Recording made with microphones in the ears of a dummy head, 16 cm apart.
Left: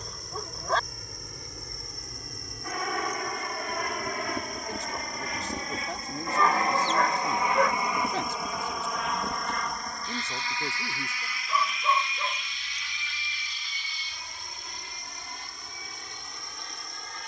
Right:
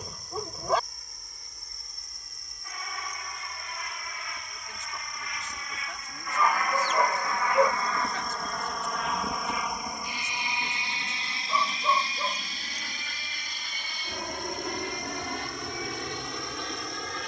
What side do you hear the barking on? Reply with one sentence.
You can hear the barking in the centre.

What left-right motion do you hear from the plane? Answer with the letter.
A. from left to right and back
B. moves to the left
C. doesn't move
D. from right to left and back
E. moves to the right
E.